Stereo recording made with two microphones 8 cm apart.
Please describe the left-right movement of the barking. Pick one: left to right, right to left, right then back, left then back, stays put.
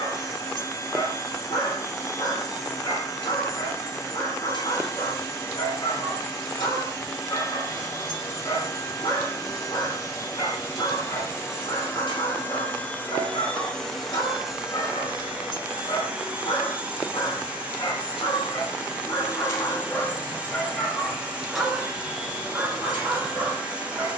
left to right.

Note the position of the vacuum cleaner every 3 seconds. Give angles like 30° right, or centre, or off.
40° left, 40° left, 40° left, 40° left, 10° left, 10° right, 10° right, 10° right.